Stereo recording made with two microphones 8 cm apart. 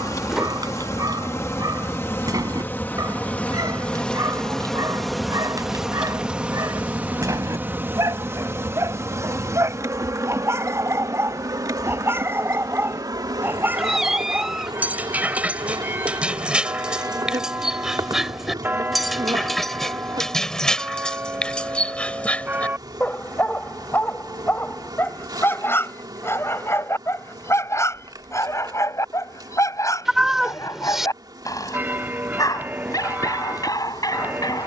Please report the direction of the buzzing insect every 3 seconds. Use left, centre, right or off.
left, centre, right, right, right, right, right, right, right, right, right, right.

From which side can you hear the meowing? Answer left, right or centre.
centre.